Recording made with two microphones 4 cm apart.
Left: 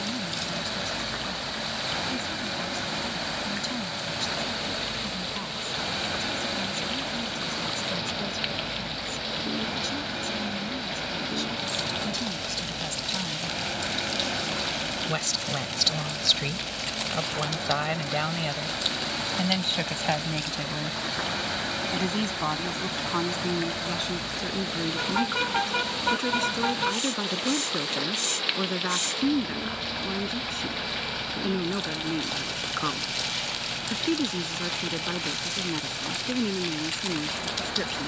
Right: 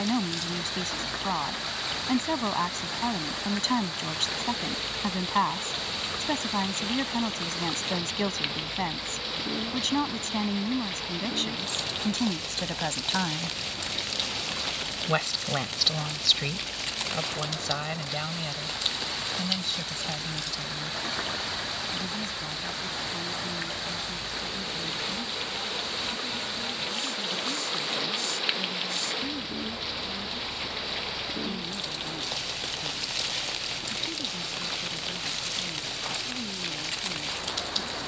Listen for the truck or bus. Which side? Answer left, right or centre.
left.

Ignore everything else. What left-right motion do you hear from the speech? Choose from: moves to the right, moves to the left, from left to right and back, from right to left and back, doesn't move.
moves to the left.